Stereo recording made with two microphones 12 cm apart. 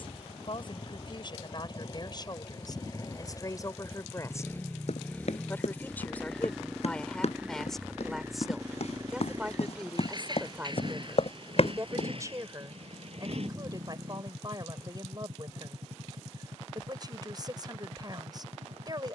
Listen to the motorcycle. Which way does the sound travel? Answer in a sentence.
In this clip you hear the motorcycle move to the right.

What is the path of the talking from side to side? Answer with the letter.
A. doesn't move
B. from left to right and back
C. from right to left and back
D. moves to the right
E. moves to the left
D.